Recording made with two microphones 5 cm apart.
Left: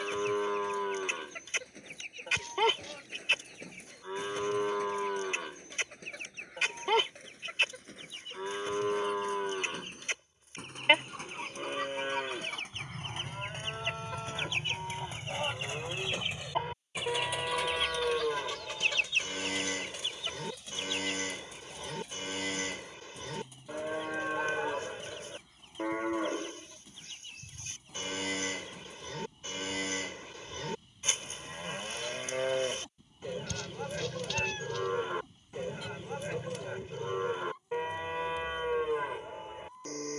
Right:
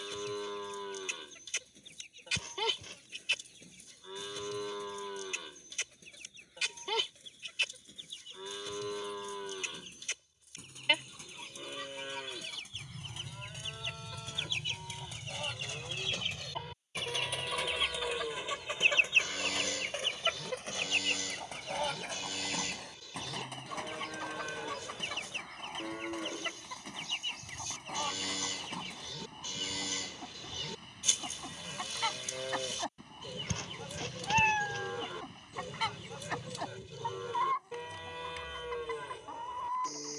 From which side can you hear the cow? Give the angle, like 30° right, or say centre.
40° left.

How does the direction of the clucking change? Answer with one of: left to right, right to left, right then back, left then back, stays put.
left to right.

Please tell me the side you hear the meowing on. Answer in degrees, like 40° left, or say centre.
40° right.